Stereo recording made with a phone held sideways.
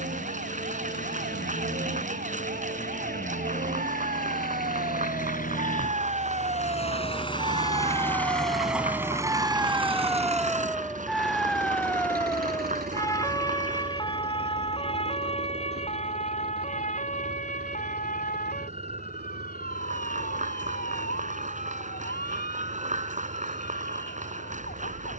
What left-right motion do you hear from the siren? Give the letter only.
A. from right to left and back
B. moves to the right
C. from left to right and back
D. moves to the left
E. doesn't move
D.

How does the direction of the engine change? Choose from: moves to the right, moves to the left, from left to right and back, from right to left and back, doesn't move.
moves to the right.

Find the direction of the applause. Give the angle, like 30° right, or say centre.
50° right.